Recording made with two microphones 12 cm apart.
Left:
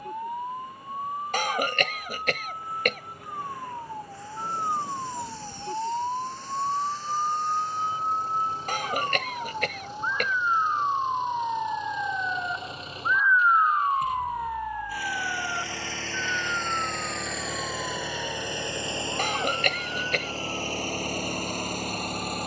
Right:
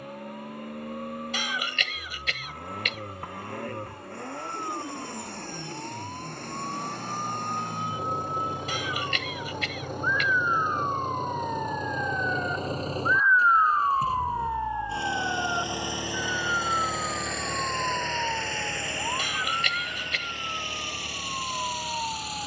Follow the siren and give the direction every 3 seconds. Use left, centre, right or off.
left, left, left, left, centre, right, right, right.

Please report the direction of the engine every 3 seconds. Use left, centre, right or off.
right, right, right, right, right, centre, left, left.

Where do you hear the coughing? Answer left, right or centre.
left.